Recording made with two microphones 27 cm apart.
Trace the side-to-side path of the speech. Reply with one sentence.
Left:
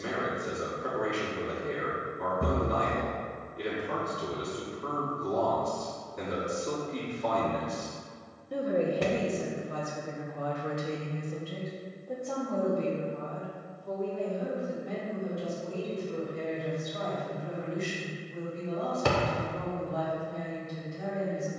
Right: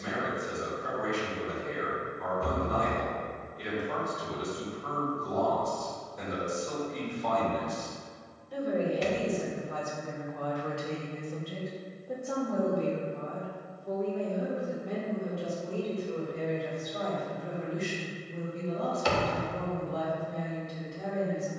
In this clip you hear the speech go from the left side to the right.